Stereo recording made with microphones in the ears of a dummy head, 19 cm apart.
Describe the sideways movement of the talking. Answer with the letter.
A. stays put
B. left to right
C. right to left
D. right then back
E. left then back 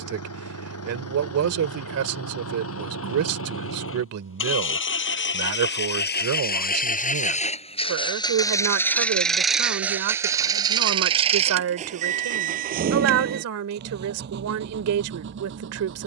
A.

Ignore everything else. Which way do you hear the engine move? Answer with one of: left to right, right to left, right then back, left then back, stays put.
left to right.